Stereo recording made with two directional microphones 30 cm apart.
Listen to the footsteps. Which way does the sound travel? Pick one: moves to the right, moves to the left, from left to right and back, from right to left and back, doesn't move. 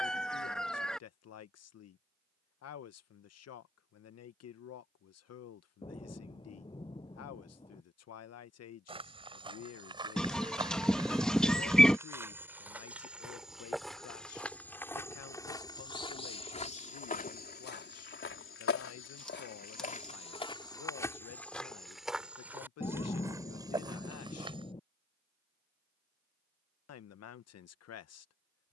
from right to left and back.